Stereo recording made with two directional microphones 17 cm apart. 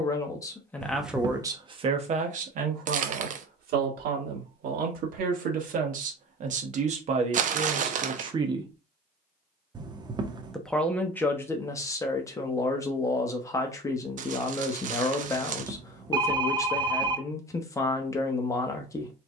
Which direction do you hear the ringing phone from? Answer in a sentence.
You can hear the ringing phone on the right.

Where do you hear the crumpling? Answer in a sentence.
You can hear the crumpling on the right.